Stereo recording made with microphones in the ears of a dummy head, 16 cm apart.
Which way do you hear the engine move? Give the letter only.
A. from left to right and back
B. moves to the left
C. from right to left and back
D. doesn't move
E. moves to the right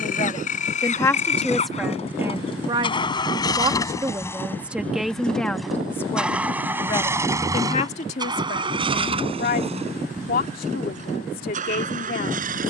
E.